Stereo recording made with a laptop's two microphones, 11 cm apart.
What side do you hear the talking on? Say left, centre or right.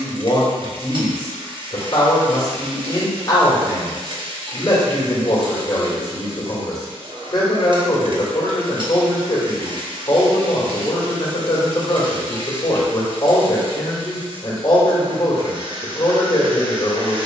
left.